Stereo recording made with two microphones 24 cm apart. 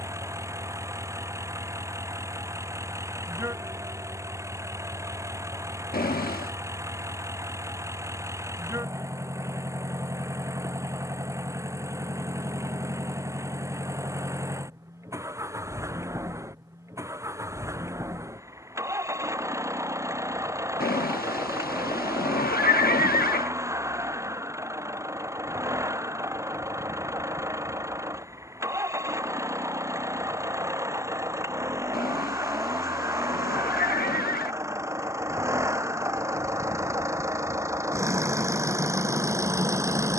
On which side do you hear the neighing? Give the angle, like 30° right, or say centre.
40° left.